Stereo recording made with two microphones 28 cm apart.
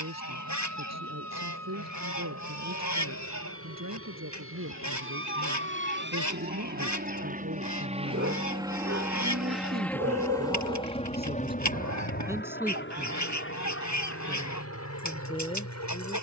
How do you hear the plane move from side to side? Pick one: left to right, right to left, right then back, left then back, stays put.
right to left.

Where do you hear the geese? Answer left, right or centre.
left.